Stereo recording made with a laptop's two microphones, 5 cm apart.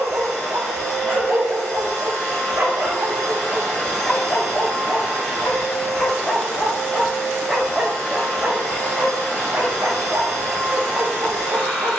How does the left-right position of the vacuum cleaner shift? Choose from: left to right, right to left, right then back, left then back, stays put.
stays put.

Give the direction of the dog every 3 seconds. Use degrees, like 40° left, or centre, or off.
40° right, 10° left, centre, 40° right.